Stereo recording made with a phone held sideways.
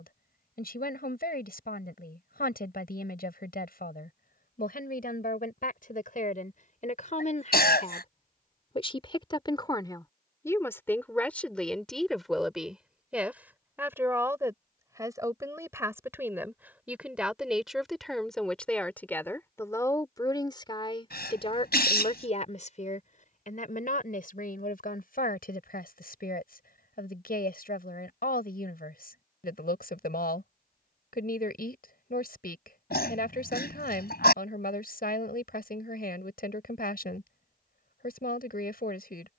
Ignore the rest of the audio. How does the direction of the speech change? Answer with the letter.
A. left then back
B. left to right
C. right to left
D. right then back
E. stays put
D.